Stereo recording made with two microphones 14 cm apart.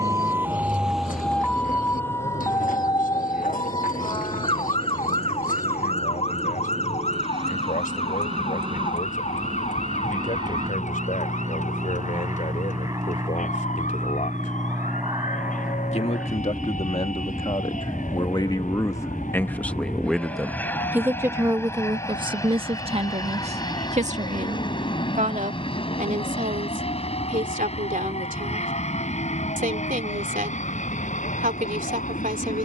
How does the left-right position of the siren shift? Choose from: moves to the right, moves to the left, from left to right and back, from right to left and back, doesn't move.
moves to the left.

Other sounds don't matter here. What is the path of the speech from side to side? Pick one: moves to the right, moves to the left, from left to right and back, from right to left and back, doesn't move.
moves to the right.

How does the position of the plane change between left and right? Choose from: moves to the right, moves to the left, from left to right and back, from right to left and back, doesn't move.
moves to the left.